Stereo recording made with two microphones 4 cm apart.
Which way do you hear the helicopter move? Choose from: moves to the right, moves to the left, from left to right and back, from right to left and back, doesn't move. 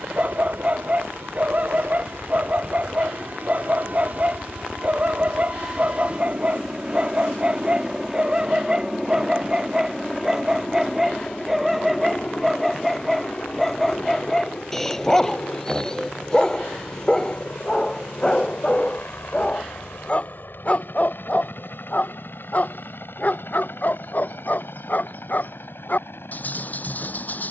moves to the left.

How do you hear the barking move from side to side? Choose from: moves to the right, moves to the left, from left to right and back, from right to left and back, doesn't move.
moves to the left.